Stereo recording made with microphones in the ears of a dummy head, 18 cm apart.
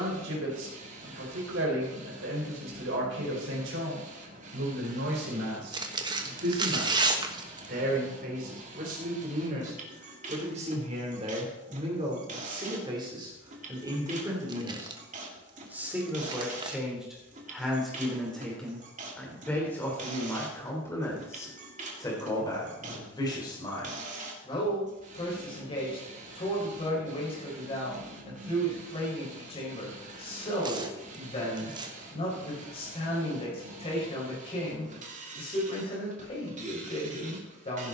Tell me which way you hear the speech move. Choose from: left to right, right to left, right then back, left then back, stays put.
right to left.